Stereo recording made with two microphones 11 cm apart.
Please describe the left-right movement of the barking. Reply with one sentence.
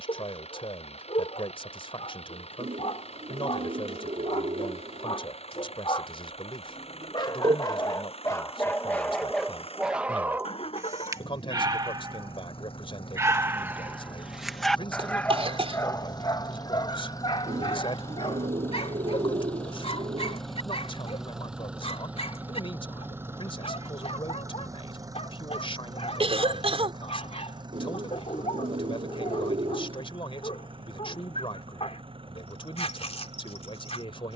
You can hear the barking move from left to right and back again.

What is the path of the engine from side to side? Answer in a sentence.
In this clip you hear the engine move from left to right.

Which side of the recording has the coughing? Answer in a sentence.
You can hear the coughing on the right.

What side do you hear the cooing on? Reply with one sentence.
In this clip you hear the cooing on the right.